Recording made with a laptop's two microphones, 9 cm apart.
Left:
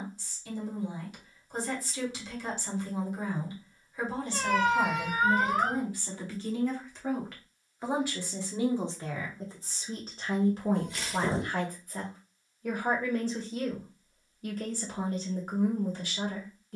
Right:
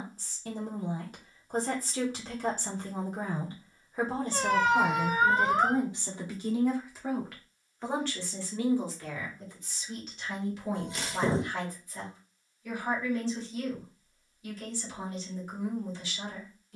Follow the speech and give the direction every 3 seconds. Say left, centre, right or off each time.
right, right, centre, left, left, left.